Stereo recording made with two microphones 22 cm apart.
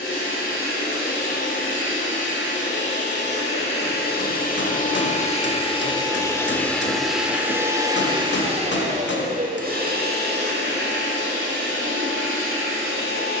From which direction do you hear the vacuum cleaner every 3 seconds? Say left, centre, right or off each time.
left, left, centre, right, right.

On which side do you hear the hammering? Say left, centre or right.
left.